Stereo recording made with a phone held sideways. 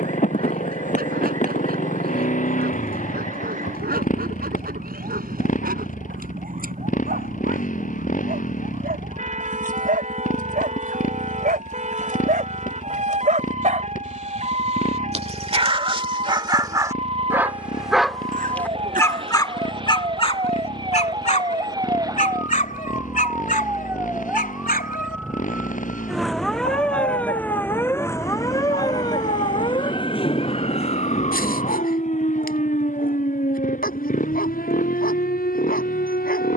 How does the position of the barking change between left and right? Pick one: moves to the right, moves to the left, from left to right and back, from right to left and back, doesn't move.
moves to the left.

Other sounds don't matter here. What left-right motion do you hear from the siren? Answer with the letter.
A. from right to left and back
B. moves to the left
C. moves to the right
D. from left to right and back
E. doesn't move
B.